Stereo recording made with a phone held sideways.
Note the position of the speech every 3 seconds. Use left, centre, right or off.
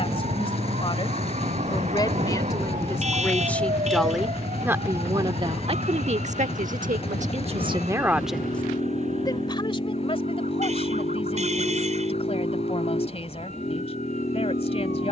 left, centre, right, left, left.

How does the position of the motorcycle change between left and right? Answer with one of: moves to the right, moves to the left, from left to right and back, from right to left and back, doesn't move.
doesn't move.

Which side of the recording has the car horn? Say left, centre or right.
right.